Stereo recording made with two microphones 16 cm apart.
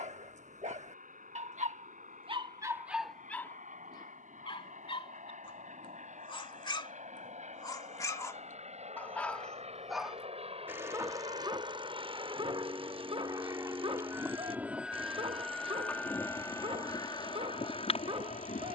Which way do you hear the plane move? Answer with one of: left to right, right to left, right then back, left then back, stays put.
right to left.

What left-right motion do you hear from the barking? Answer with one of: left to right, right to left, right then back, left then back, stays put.
left then back.